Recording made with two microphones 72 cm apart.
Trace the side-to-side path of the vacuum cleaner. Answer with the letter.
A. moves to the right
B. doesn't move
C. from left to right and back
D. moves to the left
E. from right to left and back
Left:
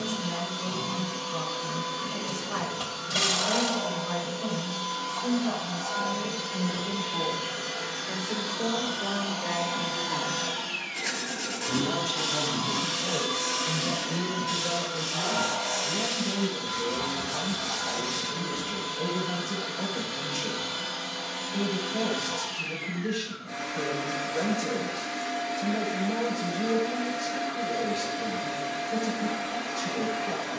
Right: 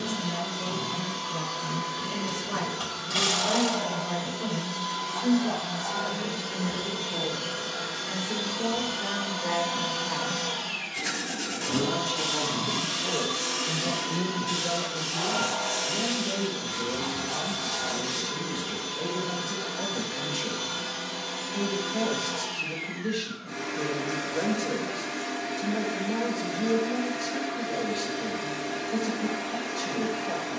D.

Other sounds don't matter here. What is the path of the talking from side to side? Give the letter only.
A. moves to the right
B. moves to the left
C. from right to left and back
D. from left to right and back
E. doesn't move
B.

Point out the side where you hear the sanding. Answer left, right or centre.
right.